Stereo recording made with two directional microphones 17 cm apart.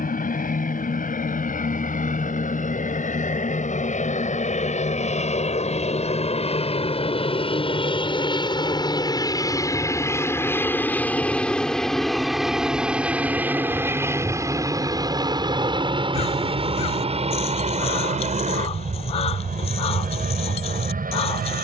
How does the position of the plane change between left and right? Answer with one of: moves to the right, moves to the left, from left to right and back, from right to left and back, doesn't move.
moves to the right.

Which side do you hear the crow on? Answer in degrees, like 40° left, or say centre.
40° left.